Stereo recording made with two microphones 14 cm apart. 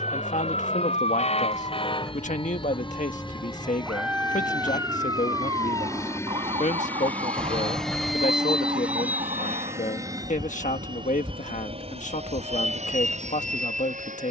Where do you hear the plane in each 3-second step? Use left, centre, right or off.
left, left, centre, right, right.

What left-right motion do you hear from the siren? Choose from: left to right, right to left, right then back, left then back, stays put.
left to right.